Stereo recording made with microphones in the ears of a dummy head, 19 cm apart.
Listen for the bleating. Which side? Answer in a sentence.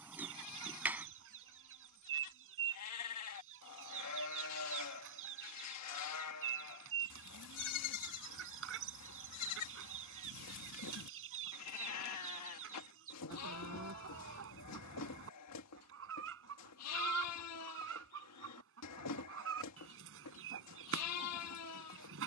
You can hear the bleating on the left.